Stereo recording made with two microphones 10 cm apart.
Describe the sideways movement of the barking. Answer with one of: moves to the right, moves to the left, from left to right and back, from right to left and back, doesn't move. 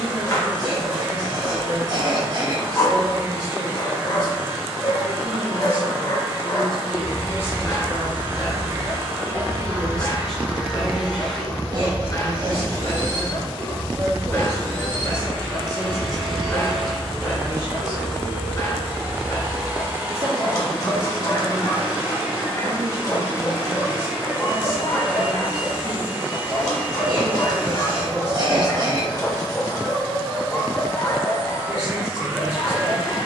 doesn't move.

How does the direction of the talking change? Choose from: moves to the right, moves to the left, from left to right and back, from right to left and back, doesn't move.
from right to left and back.